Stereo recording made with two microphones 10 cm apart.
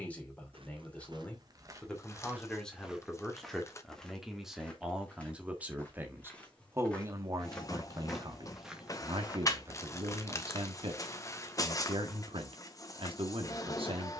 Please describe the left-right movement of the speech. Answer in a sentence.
You can hear the speech travel towards the right.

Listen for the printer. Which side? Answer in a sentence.
In this clip you hear the printer on the left.